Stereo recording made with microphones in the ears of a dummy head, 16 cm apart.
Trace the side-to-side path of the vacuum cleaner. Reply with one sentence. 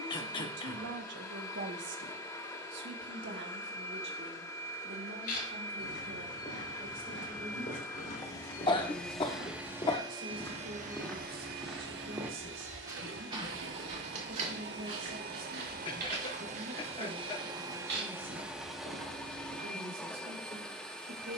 In this clip you hear the vacuum cleaner move from left to right and back again.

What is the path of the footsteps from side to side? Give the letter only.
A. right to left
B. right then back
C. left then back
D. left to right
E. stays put
D.